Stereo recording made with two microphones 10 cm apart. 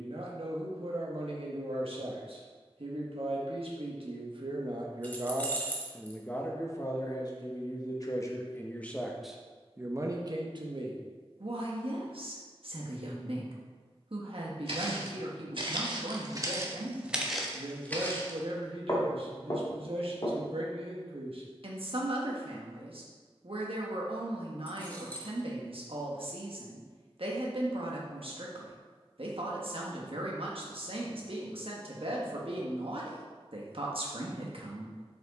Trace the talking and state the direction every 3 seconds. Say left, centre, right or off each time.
right, right, left, right, right, right, right, right, right, right, right, right.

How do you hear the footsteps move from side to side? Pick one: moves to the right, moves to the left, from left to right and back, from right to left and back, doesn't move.
moves to the left.